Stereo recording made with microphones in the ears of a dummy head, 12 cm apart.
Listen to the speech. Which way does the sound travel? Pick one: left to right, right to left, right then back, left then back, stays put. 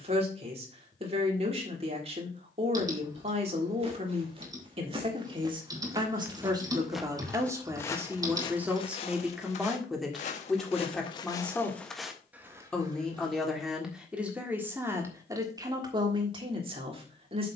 left then back.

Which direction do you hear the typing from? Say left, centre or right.
right.